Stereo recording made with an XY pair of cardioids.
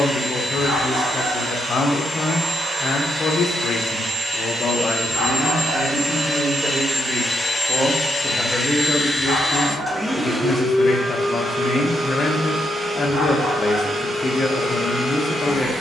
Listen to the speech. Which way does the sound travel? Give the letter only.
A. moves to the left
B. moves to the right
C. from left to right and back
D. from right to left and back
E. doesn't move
C.